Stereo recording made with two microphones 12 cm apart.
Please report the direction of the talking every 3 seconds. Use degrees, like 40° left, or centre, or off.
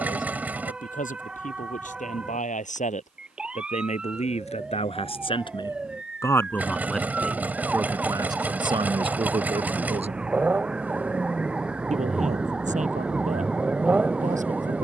70° left, 50° left, 10° right, 50° right, 70° right.